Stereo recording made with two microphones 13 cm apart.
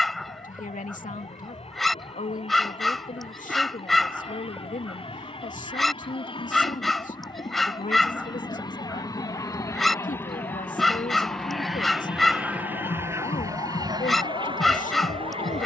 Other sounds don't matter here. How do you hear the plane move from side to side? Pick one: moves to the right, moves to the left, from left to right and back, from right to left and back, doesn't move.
moves to the right.